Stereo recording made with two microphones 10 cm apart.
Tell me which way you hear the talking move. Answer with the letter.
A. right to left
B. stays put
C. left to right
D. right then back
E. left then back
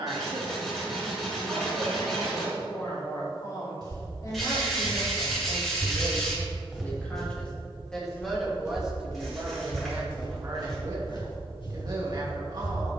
E.